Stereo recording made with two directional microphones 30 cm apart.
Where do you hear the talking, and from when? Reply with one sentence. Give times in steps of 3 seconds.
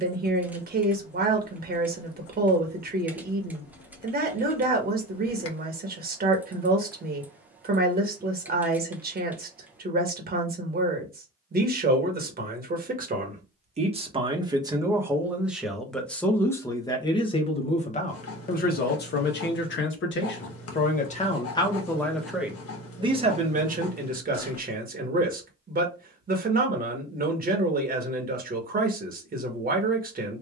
In this clip you hear the talking on the right from 0 s, in the centre from 15 s, on the left from 18 s, in the centre from 21 s and on the right from 24 s.